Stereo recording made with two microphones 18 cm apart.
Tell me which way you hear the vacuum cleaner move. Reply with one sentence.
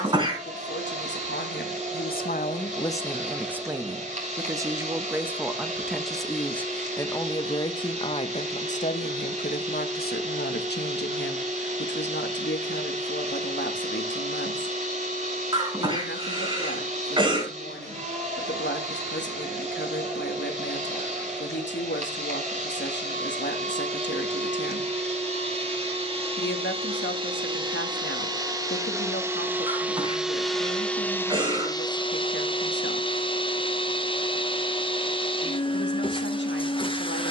In this clip you hear the vacuum cleaner move from right to left.